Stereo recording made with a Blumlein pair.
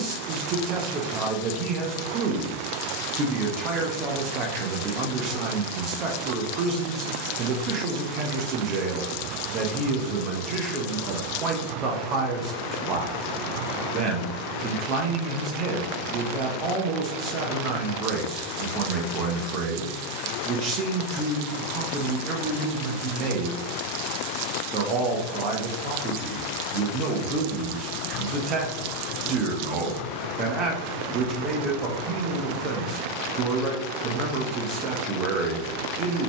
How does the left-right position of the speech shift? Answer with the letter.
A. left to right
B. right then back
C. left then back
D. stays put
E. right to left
D.